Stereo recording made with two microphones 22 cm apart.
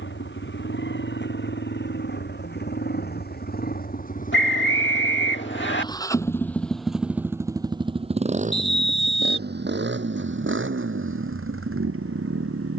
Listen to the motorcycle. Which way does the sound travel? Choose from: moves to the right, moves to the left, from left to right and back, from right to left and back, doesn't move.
moves to the right.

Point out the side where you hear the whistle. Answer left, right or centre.
left.